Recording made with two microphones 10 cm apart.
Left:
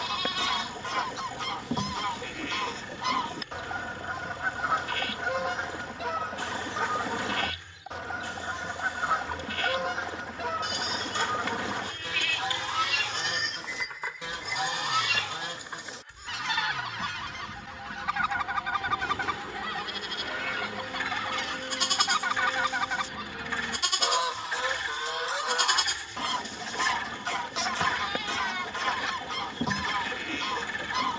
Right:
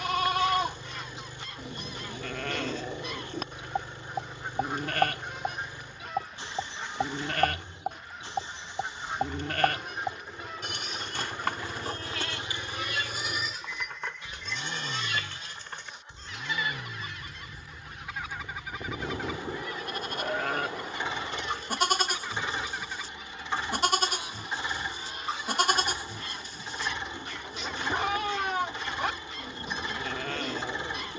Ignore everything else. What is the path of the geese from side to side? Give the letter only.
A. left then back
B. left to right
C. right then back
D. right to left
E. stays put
E.